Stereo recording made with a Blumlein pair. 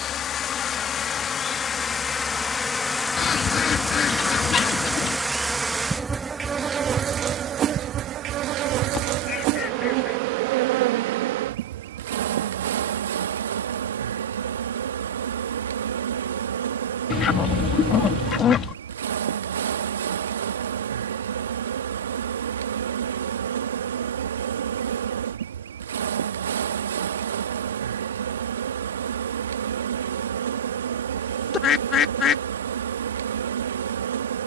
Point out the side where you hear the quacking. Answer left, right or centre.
left.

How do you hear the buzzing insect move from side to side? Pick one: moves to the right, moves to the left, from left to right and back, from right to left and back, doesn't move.
moves to the right.